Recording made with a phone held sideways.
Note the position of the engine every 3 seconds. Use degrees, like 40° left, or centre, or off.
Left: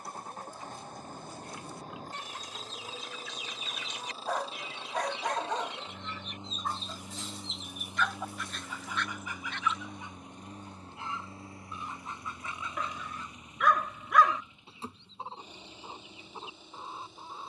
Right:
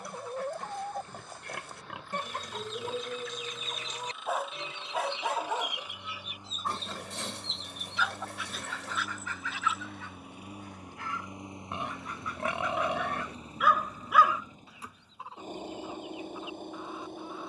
40° left, 30° left, 10° left, 10° right, 30° right, 50° right.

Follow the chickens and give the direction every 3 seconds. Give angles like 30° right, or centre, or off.
70° right, 30° right, centre, 20° left, 30° left, 30° left.